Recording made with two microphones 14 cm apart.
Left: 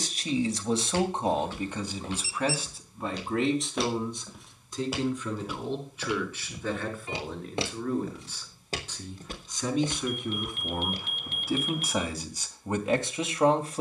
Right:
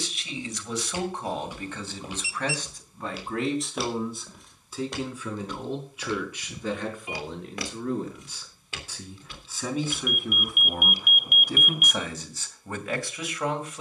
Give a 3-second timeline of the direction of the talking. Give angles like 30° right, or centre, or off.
20° left, centre, 10° right, centre, 20° left.